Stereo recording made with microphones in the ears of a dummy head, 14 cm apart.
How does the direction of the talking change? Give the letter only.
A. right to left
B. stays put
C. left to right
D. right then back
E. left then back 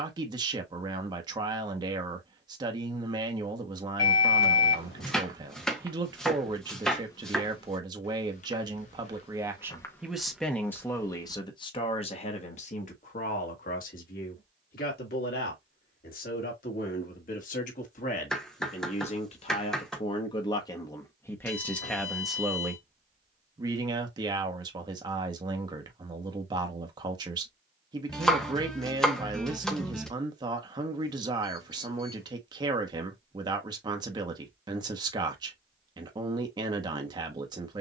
E.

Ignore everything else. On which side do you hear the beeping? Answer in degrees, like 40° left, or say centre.
70° left.